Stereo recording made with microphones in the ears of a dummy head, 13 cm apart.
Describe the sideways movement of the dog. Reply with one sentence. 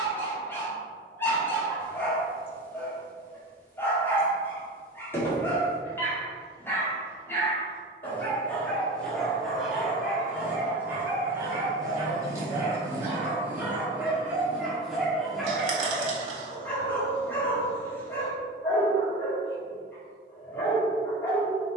You can hear the dog move from left to right and back again.